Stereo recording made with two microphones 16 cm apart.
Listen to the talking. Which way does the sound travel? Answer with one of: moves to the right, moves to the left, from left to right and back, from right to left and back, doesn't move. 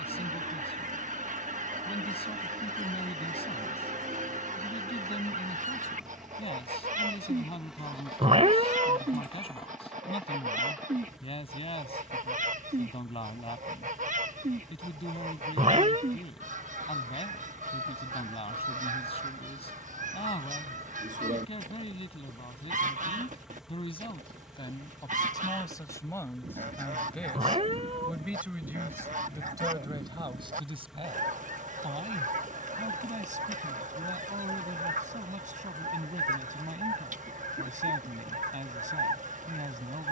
moves to the right.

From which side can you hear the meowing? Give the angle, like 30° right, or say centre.
40° right.